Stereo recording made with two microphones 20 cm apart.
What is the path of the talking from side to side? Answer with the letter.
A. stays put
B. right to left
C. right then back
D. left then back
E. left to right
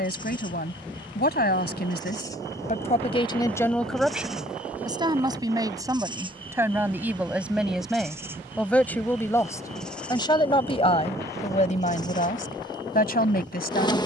C.